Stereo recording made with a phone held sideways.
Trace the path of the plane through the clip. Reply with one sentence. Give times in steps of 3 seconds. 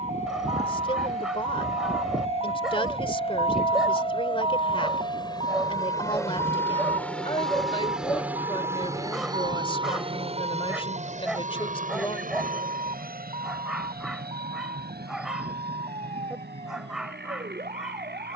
You can hear the plane on the left from 0 s, in the centre from 6 s and on the right from 9 s.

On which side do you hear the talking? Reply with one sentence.
You can hear the talking on the left.